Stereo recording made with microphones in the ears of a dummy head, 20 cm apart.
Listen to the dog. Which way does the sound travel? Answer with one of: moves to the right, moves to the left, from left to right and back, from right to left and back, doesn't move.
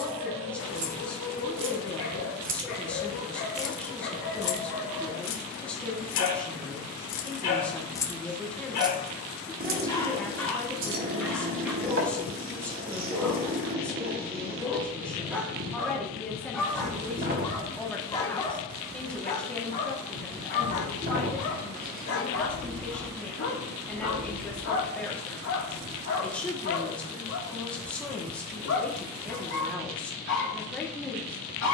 from left to right and back.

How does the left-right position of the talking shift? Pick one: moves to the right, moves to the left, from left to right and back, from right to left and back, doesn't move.
doesn't move.